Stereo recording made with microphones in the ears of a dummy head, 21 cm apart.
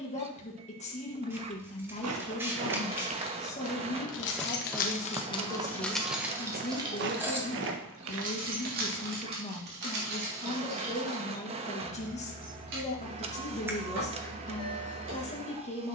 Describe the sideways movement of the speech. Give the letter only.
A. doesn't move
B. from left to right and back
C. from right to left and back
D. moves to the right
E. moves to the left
A.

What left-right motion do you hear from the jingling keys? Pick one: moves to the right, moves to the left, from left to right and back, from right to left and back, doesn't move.
moves to the right.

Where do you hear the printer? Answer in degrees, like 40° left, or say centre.
30° right.